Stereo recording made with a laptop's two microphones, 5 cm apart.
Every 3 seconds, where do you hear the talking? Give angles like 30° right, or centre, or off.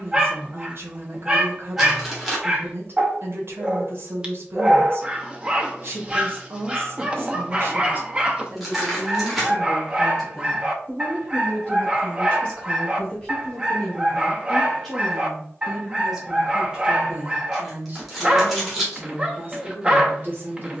50° right, 50° right, 50° right, 10° left, 10° left, 20° right, 40° right.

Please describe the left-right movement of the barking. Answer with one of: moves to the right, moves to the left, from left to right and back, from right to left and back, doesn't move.
doesn't move.